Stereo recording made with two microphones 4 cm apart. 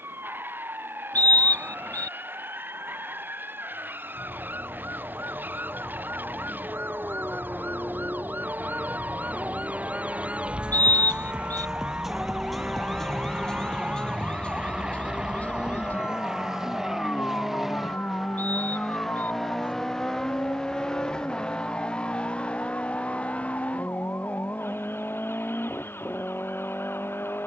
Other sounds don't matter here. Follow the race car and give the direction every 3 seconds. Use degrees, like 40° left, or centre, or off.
60° right, 60° right, 50° right, 40° right, 30° right, 10° right, 10° left, 30° left, 40° left.